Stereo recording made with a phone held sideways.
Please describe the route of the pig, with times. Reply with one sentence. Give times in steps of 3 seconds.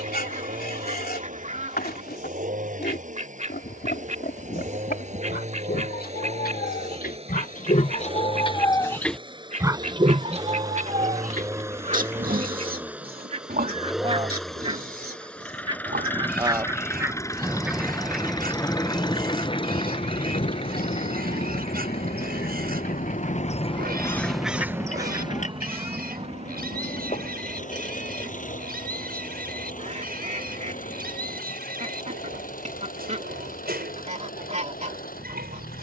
In this clip you hear the pig on the left from 0 s and on the right from 9 s.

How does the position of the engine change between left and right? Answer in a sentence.
In this clip you hear the engine move from right to left.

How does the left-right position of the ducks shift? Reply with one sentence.
In this clip you hear the ducks go left and come back.